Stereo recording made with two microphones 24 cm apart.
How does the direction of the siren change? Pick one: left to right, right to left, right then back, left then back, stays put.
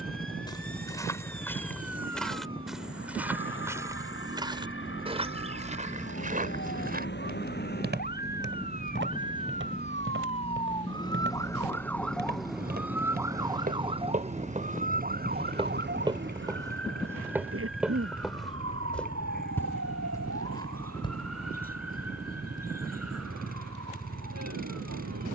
left to right.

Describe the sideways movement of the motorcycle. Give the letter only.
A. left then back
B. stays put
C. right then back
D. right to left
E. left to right
B.